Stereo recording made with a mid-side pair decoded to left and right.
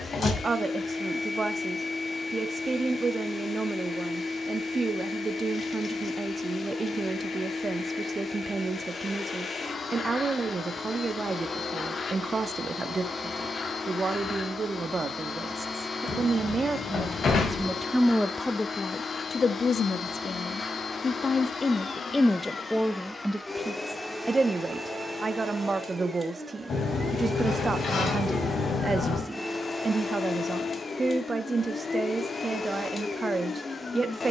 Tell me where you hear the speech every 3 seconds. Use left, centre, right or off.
right, right, right, right, right, right, left, centre, right, right, right, right.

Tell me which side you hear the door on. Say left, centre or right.
left.